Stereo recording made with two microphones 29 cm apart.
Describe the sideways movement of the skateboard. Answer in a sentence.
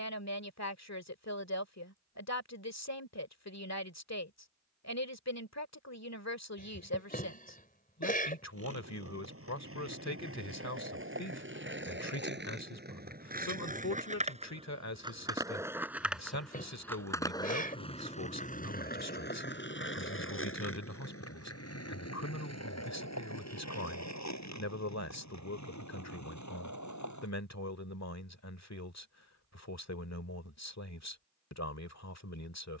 In this clip you hear the skateboard move to the left.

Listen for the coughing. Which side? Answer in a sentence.
In this clip you hear the coughing on the left.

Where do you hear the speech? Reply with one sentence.
You can hear the speech on the left.